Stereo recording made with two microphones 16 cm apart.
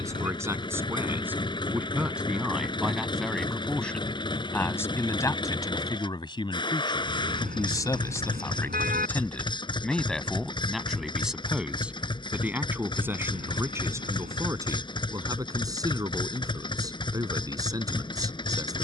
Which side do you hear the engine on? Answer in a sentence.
In this clip you hear the engine on the left.